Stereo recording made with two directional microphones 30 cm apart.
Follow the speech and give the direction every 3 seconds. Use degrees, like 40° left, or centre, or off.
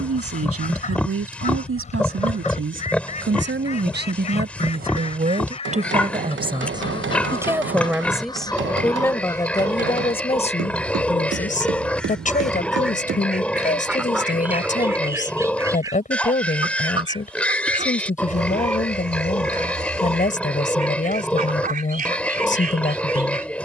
50° right, 30° right, 10° right, 20° left, 30° left, 30° left, 30° left, 30° left.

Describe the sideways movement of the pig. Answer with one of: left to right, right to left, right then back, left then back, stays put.
stays put.